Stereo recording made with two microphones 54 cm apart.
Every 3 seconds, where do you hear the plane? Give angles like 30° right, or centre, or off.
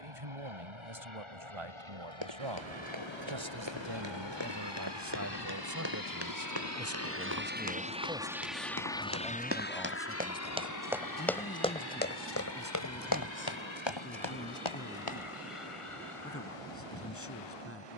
70° right, 60° right, 20° right, 30° left, 50° left, 60° left.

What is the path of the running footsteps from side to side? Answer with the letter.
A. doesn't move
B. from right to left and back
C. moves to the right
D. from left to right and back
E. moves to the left
E.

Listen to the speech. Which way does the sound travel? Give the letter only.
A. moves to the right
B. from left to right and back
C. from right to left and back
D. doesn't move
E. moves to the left
E.